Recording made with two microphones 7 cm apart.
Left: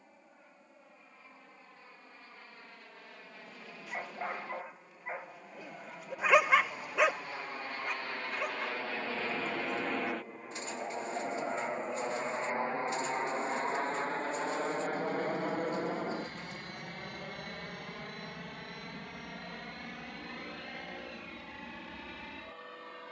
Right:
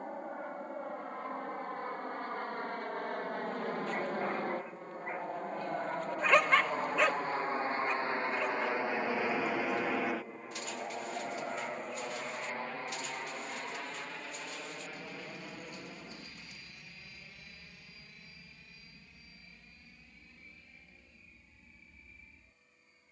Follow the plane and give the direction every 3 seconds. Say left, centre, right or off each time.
right, right, right, centre, left, left, left, left.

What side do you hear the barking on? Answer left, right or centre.
centre.